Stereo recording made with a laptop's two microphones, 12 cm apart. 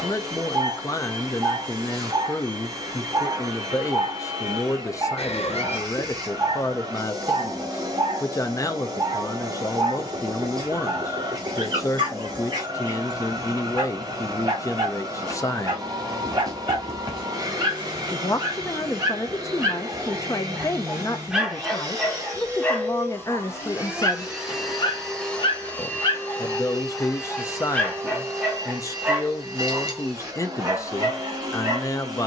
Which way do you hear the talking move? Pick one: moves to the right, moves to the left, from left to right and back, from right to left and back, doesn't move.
doesn't move.